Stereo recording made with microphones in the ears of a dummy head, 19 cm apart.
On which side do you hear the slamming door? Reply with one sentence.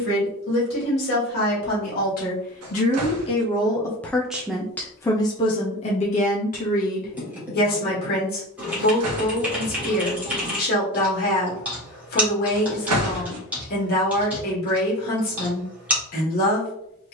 In this clip you hear the slamming door on the right.